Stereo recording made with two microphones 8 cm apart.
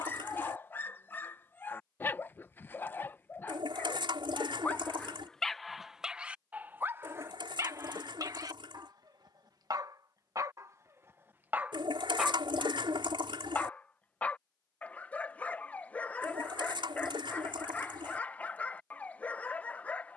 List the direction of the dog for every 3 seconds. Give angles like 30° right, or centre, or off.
20° left, 20° left, 30° right, 40° right, 10° left, 20° left, 20° left.